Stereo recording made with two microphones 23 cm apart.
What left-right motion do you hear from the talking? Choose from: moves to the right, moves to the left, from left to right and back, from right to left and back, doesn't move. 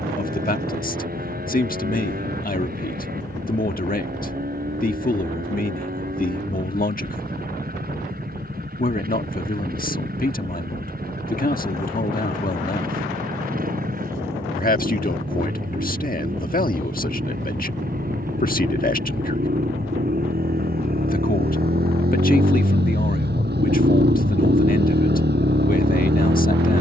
doesn't move.